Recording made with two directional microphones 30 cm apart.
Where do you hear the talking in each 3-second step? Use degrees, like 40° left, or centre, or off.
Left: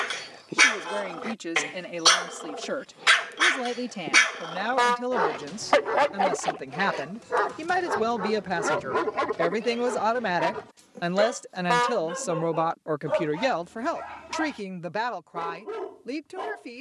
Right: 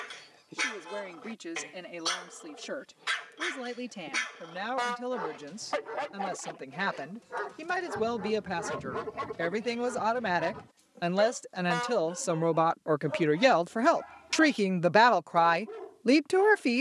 50° left, 40° left, 40° left, 20° left, 10° right, 60° right.